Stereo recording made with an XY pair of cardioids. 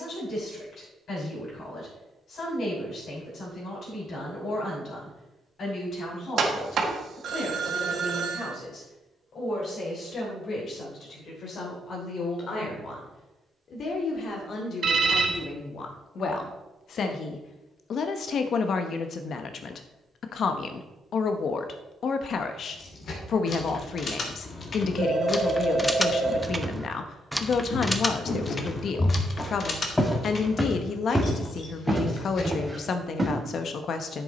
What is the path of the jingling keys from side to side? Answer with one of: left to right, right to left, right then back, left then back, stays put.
right then back.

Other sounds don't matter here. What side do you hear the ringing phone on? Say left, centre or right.
right.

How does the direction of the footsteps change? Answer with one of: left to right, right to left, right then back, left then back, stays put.
left to right.